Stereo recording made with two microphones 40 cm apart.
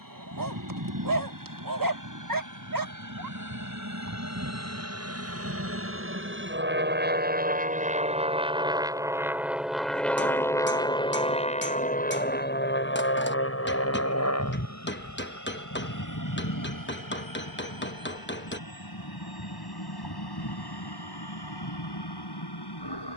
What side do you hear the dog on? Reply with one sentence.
In this clip you hear the dog on the right.